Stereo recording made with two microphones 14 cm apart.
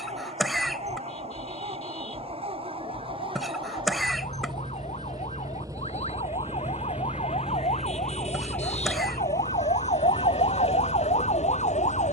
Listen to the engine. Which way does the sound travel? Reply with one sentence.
In this clip you hear the engine move from right to left.